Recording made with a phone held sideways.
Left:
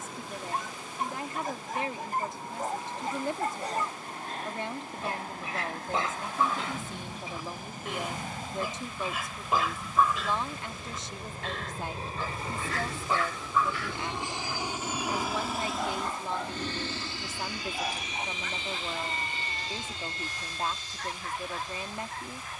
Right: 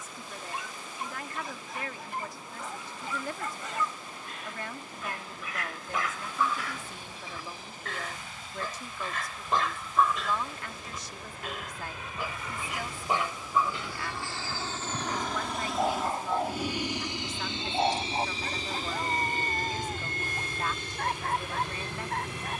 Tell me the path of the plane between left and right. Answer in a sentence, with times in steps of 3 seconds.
In this clip you hear the plane on the left from 0 s, in the centre from 15 s and on the right from 18 s.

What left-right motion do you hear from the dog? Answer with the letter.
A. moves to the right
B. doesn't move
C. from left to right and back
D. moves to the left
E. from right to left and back
A.